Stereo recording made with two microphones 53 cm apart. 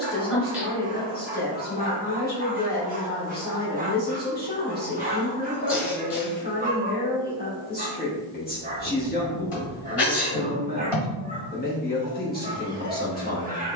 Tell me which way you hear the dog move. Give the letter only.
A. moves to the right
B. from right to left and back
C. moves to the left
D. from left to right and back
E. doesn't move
E.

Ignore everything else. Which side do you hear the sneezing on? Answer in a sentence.
You can hear the sneezing on the left.